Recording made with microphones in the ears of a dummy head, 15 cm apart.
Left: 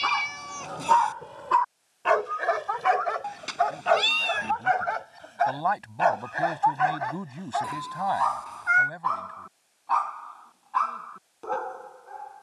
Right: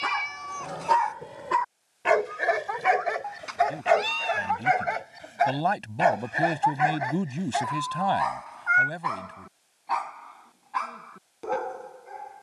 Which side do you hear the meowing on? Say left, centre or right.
left.